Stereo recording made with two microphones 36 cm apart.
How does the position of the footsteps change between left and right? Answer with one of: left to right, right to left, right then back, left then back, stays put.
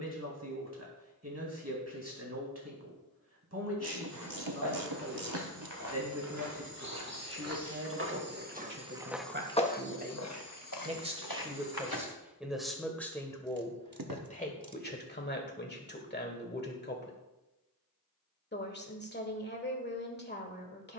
right to left.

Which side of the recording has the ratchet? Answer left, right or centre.
right.